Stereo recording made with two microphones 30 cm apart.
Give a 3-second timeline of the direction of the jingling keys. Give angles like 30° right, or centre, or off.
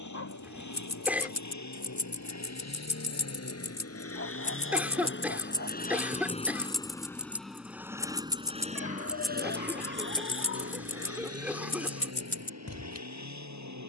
50° left, 20° left, centre, 20° left, 50° left.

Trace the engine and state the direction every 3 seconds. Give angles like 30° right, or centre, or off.
60° left, 40° left, centre, 40° right, 60° right.